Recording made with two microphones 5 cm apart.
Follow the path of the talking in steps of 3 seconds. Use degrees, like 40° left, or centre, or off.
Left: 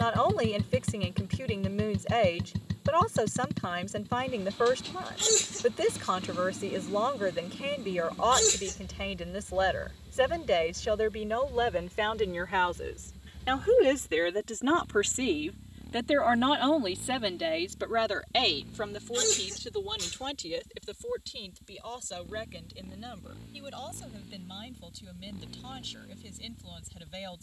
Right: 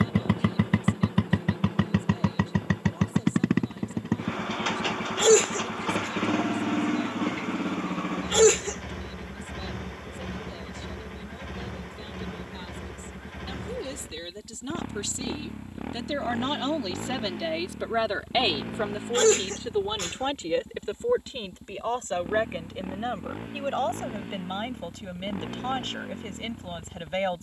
70° left, 70° left, 70° left, 70° left, 60° left, 10° left, 20° right, 40° right, 50° right.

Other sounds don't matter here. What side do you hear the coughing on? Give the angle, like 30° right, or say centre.
50° right.